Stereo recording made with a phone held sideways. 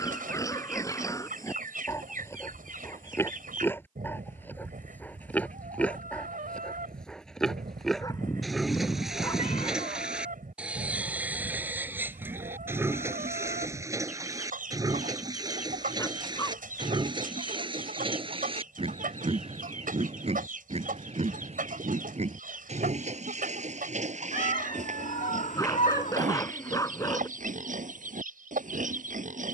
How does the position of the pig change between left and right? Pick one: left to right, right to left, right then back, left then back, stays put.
left to right.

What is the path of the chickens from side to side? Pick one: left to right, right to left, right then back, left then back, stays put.
stays put.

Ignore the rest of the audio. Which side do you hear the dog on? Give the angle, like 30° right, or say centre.
20° left.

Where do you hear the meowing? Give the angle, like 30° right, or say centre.
70° left.